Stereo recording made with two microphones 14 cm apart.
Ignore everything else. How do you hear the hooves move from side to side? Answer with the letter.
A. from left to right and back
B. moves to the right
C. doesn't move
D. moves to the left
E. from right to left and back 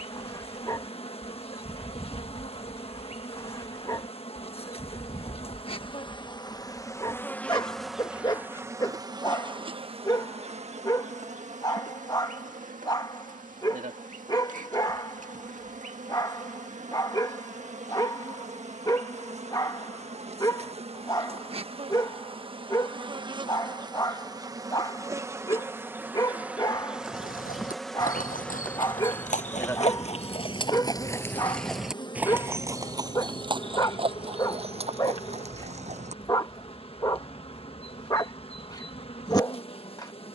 B.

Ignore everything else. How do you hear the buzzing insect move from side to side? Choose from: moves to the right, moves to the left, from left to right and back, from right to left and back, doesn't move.
from left to right and back.